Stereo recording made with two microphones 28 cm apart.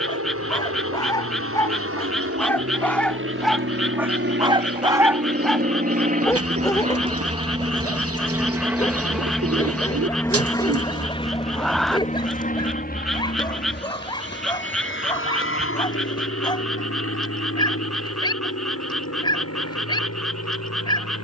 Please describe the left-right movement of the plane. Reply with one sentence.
In this clip you hear the plane travel towards the left.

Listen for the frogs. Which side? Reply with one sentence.
In this clip you hear the frogs in the centre.